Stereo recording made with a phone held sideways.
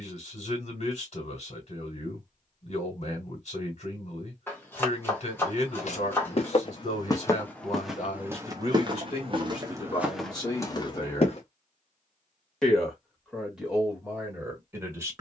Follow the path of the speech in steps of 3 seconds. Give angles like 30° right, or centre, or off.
50° left, 50° left, 50° left, 30° left, 10° right.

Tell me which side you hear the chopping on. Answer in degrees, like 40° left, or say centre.
10° left.